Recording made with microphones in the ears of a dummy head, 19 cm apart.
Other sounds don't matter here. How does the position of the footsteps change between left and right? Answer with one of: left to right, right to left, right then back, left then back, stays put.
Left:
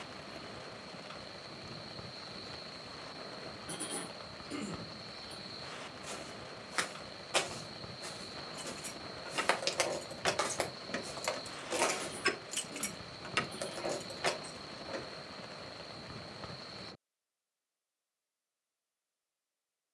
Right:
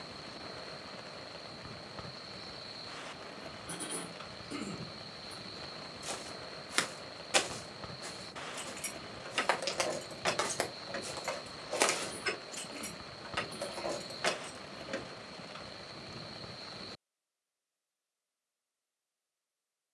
left then back.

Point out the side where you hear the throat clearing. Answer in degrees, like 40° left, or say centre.
centre.